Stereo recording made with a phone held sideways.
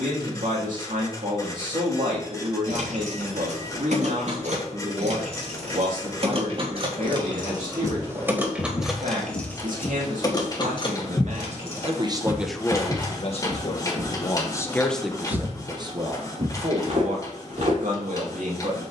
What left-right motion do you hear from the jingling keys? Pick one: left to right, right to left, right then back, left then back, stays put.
right to left.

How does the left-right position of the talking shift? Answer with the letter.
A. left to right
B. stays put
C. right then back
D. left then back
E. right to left
D.